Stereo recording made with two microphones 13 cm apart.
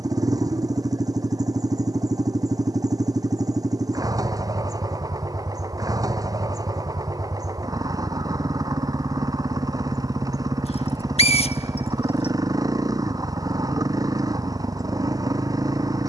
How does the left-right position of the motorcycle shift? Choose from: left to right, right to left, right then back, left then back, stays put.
stays put.